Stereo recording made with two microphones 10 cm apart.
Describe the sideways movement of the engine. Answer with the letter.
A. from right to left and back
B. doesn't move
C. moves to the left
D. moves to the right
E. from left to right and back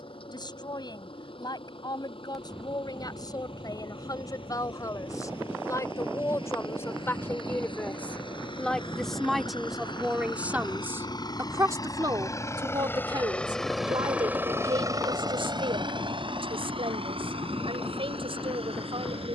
D.